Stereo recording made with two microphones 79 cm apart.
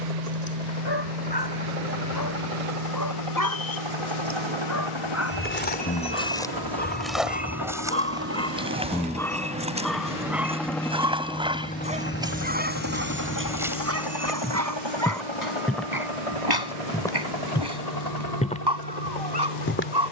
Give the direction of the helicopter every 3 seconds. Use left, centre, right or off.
right, right, right, centre, left, left, left.